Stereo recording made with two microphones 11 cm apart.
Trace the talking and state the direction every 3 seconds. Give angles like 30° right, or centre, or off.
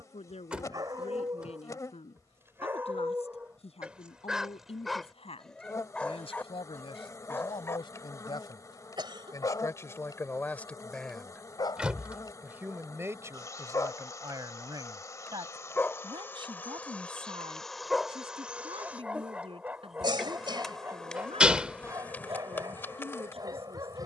80° left, 70° left, 50° left, 20° left, 30° right, 50° right, 60° right, 70° right.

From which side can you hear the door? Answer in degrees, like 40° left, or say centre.
10° right.